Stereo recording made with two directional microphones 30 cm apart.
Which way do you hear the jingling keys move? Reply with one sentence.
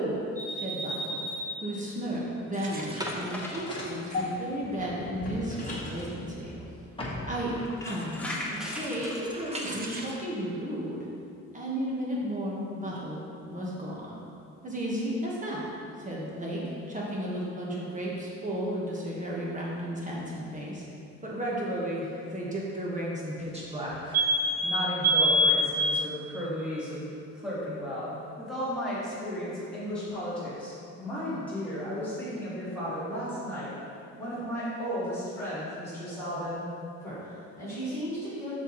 In this clip you hear the jingling keys move from right to left and back again.